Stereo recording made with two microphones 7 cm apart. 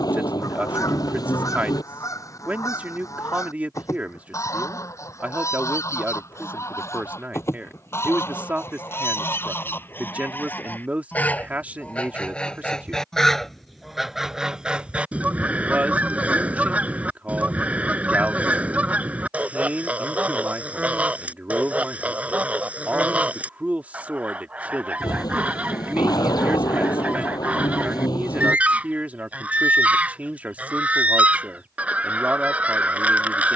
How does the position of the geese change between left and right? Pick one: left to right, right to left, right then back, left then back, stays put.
left to right.